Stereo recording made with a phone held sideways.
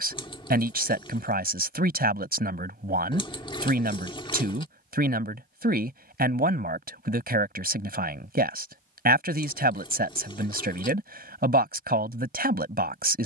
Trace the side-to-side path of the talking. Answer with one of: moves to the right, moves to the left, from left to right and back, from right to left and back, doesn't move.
doesn't move.